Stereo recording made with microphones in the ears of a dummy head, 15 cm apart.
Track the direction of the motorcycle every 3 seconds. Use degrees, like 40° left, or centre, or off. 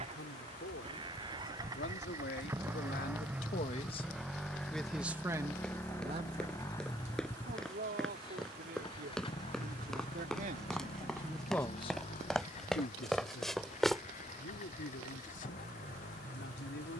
20° right, centre, 20° left, 40° left, 40° left, 50° left.